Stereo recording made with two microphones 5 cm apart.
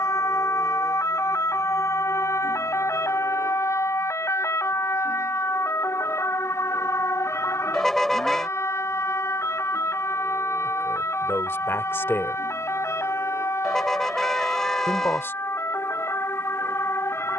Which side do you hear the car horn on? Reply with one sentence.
In this clip you hear the car horn in the centre.